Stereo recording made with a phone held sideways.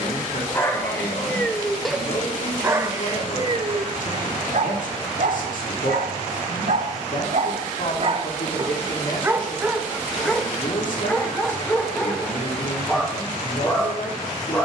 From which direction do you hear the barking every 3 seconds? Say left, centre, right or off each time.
centre, right, right, centre, centre.